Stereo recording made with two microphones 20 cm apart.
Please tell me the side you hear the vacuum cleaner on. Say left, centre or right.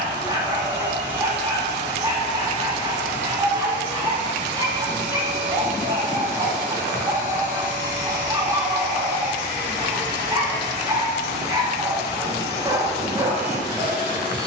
right.